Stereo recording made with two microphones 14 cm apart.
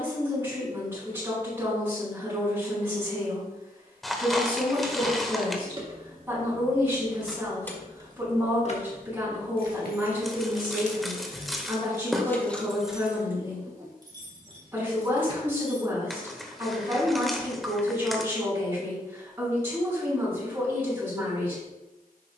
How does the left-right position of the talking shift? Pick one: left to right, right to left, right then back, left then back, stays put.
stays put.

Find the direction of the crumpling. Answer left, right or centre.
centre.